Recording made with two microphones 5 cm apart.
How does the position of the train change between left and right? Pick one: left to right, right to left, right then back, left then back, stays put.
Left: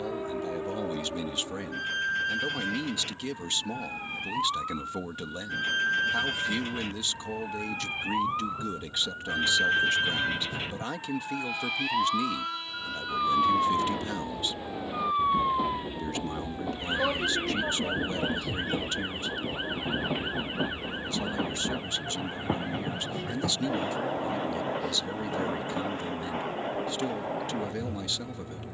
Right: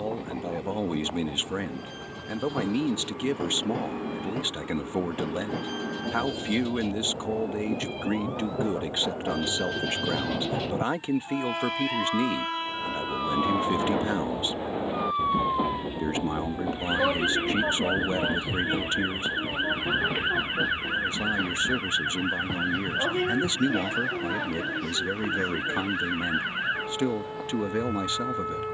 right to left.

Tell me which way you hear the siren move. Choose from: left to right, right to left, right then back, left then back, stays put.
left to right.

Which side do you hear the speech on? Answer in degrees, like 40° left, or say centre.
30° right.